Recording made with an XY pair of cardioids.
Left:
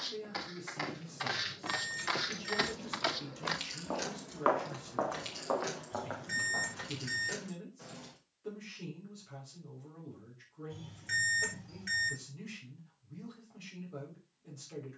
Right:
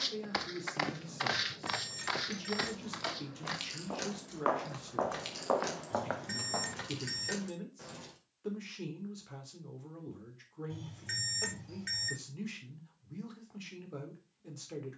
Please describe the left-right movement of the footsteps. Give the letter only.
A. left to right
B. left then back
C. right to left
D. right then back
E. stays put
B.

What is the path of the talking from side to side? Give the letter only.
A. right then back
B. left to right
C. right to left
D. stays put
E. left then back
D.